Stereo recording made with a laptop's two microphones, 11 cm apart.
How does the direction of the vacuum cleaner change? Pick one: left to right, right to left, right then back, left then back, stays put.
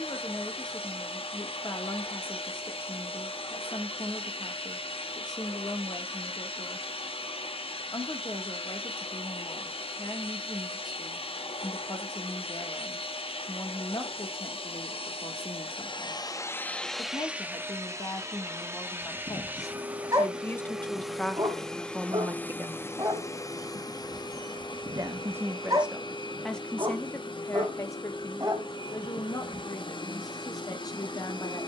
right then back.